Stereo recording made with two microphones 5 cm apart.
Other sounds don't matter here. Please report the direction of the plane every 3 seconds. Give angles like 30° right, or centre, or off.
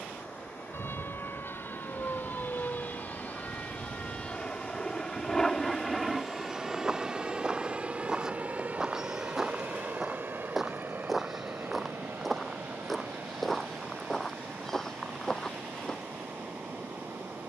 50° left, 20° left, 20° right, 40° right, 60° right, 60° right.